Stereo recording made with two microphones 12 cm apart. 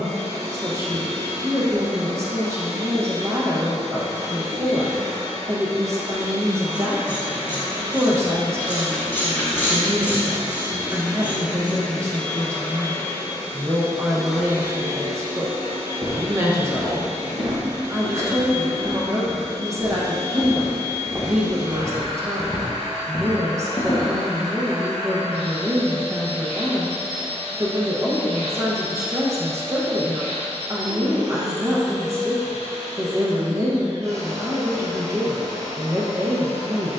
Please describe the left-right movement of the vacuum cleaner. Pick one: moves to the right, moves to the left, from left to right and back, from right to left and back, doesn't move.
from right to left and back.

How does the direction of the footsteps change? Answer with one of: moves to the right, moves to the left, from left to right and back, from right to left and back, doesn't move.
moves to the left.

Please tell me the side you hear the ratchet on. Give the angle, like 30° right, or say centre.
20° left.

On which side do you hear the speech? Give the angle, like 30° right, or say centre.
20° right.